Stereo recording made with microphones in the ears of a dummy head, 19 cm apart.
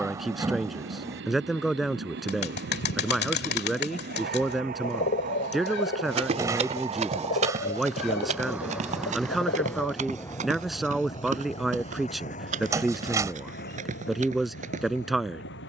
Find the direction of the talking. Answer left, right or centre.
centre.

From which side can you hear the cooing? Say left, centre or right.
left.